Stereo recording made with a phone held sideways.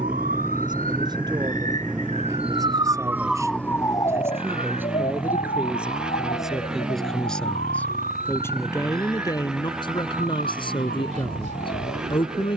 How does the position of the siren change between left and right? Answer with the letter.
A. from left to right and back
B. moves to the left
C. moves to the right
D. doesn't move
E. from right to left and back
B.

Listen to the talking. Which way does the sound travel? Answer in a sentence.
You can hear the talking travel towards the left.